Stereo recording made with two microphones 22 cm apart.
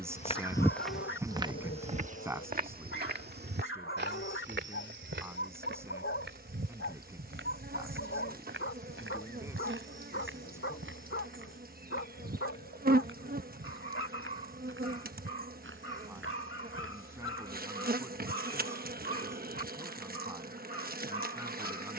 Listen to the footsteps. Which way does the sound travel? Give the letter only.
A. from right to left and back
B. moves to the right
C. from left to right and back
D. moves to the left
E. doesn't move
B.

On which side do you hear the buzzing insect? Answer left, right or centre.
right.